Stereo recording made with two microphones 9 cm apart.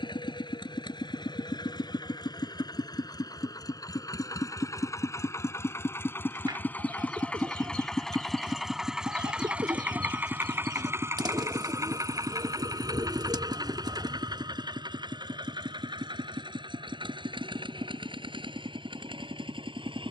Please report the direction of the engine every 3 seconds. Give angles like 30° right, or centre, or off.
60° left, 40° left, 10° left, 20° right, 50° right, 60° right, 70° right.